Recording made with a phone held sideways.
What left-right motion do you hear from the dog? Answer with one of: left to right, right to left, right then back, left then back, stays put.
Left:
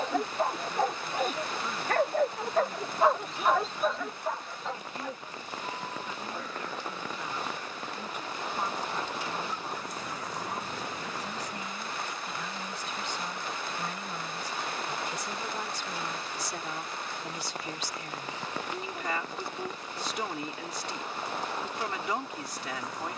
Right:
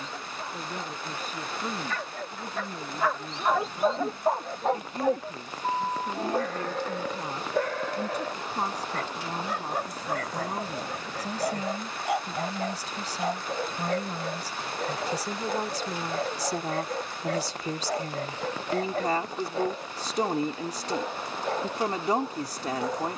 left to right.